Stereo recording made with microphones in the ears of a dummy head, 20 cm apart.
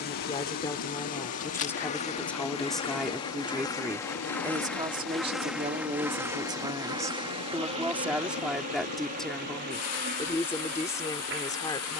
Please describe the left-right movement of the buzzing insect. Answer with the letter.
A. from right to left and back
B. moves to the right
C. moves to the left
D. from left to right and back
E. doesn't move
B.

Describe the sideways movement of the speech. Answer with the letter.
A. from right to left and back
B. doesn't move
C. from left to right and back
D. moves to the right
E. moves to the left
C.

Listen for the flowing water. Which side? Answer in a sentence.
You can hear the flowing water on the left.